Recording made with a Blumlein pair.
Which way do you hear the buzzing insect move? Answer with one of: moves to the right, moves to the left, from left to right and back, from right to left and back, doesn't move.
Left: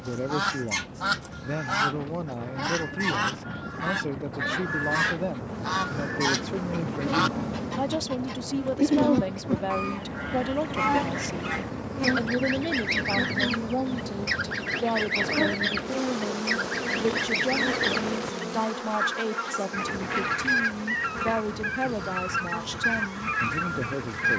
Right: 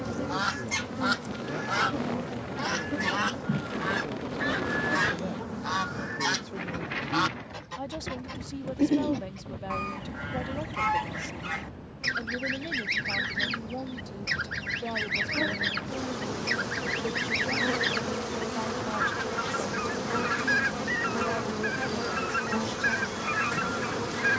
from right to left and back.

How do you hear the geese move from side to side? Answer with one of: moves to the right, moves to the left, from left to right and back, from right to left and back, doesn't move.
doesn't move.